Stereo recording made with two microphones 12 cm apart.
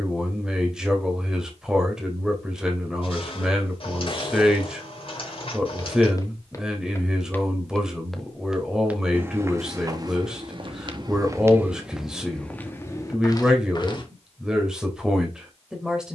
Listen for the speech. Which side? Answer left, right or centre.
centre.